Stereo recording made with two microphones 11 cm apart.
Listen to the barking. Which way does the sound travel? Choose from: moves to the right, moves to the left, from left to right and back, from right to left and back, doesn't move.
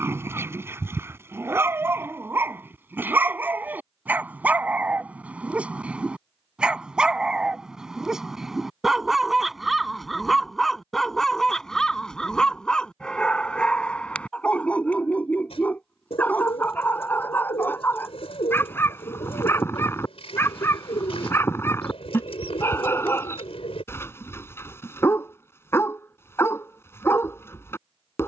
moves to the left.